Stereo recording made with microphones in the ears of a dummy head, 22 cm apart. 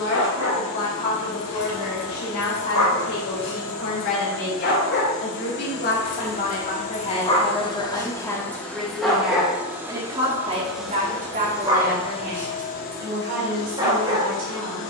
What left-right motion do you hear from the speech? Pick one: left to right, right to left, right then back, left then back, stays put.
left to right.